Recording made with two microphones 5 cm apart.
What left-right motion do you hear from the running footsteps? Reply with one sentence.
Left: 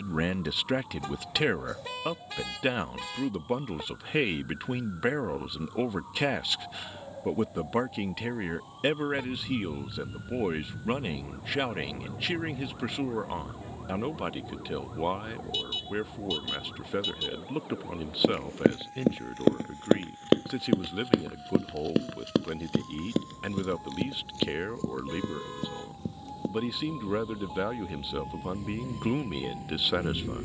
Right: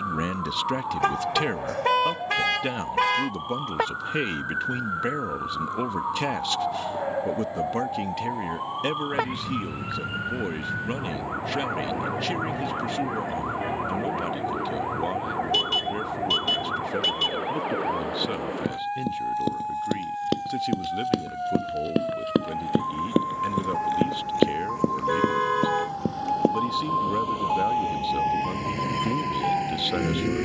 In this clip you hear the running footsteps go from the left side to the right.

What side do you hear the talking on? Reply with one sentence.
In this clip you hear the talking in the centre.